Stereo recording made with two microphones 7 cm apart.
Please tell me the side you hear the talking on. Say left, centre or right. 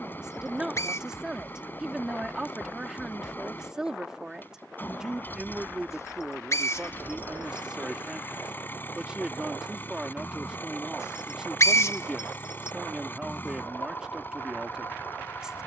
centre.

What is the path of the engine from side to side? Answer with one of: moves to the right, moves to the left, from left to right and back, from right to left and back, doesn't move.
doesn't move.